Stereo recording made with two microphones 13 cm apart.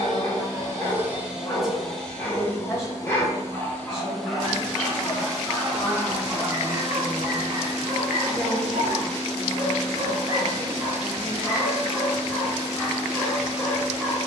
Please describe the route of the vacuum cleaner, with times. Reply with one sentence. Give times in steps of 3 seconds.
In this clip you hear the vacuum cleaner in the centre from 0 s and on the right from 6 s.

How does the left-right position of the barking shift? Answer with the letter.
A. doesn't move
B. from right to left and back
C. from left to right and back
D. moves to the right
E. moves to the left
C.